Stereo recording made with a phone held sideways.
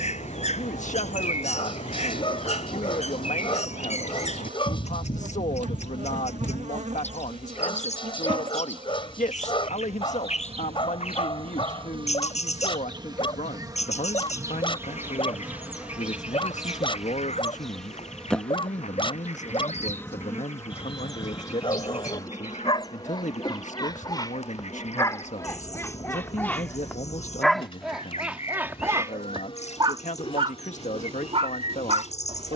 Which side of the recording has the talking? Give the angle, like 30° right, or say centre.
70° left.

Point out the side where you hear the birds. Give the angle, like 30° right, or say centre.
60° left.